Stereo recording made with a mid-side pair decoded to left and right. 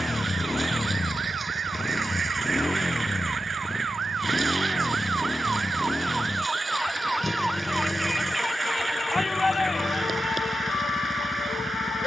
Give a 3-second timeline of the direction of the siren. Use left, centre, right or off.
right, right, centre, left.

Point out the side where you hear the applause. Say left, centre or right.
right.